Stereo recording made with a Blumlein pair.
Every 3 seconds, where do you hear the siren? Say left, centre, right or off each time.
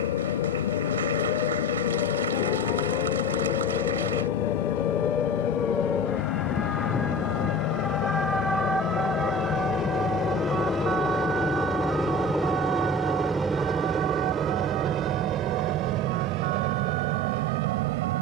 left, left, centre, right, right, right.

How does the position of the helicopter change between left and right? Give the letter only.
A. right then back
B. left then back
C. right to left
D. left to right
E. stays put
D.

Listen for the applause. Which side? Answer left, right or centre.
right.